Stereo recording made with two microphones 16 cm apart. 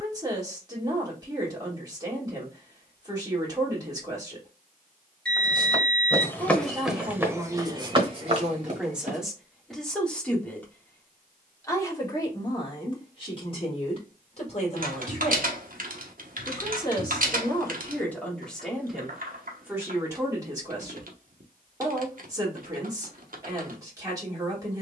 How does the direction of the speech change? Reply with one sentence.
You can hear the speech go left and come back.